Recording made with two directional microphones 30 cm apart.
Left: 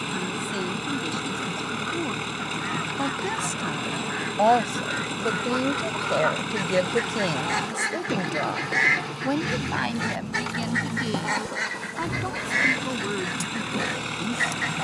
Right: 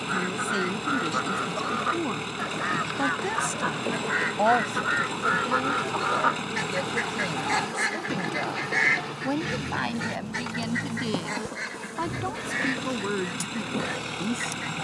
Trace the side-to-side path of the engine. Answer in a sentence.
You can hear the engine stay in one place.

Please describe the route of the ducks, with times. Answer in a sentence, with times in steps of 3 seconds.
You can hear the ducks on the right from 0 s, in the centre from 6 s and on the left from 9 s.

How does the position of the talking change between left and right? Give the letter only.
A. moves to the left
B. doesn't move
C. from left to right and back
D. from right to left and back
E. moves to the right
D.